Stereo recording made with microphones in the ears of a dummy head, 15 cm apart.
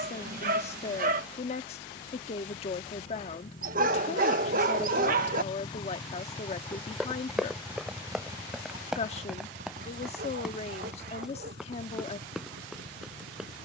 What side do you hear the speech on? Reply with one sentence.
In this clip you hear the speech on the left.